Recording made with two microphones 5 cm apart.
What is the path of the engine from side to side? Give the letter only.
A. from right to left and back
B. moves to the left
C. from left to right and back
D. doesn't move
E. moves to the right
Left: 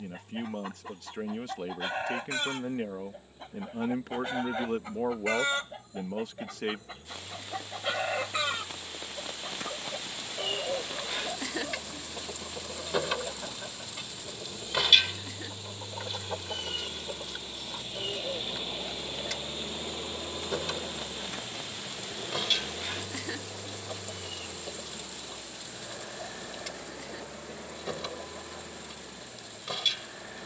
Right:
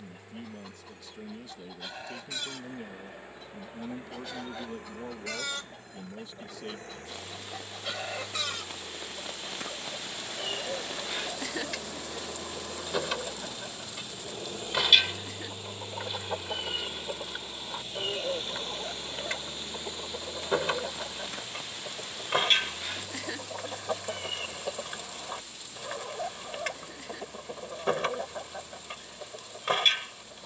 B.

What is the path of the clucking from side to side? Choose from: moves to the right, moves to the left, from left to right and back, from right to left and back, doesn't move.
moves to the right.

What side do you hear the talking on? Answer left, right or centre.
left.